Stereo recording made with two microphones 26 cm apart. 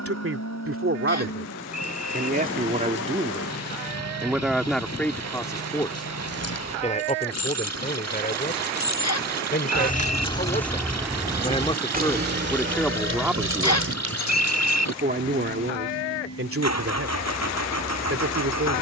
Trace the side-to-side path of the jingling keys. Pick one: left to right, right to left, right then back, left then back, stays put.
left to right.